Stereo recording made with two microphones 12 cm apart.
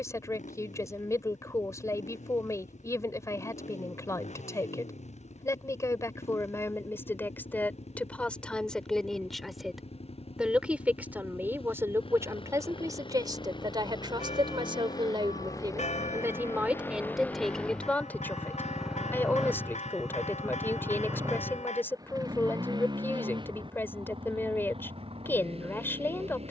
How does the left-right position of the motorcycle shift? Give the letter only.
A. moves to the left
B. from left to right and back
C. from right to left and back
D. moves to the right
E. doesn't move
D.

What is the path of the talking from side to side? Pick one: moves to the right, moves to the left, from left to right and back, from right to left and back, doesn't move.
from left to right and back.